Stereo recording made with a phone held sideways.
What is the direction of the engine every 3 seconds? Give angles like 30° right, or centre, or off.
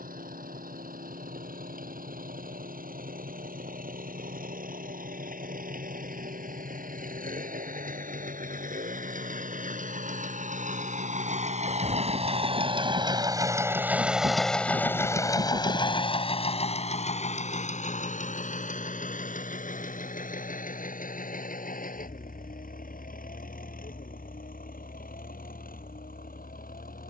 80° right, 80° right, 70° right, 60° right, 20° right, 40° left, 60° left, 70° left, 80° left.